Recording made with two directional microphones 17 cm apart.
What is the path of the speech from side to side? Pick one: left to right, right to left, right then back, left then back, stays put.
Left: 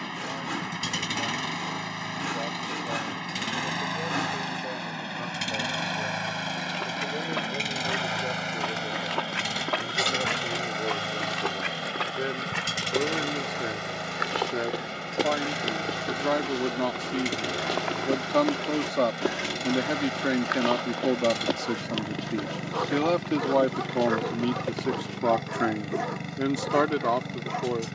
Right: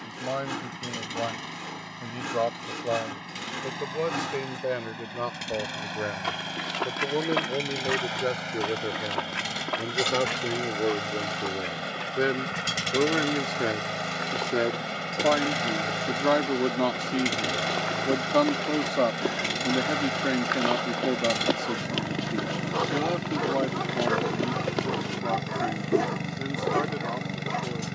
right to left.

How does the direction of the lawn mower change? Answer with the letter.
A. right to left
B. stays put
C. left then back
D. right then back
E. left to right
E.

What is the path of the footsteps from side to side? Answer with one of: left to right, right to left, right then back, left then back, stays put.
left then back.